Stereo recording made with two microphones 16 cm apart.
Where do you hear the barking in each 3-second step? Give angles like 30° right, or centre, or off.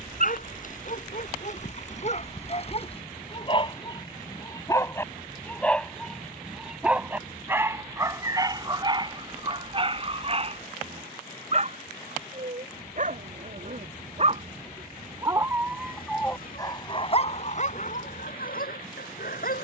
50° left, 20° left, 10° right, 40° right, 50° right, 20° left, 60° left.